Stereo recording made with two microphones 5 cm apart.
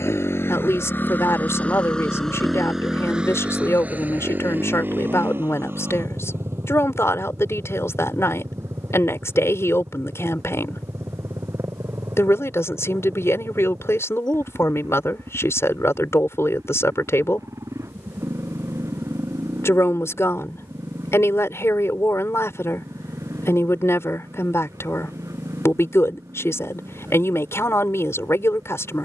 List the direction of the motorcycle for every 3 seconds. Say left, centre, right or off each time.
left, right, right, right, right, right, right, right, right, right.